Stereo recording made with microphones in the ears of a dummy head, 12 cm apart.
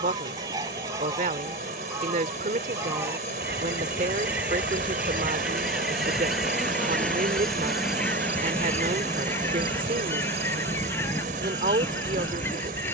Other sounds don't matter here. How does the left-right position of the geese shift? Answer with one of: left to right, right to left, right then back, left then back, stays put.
right to left.